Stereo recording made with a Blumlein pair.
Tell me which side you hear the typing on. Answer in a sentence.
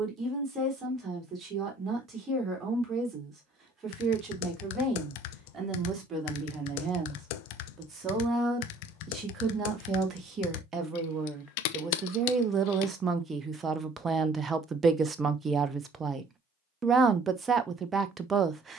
In this clip you hear the typing on the left.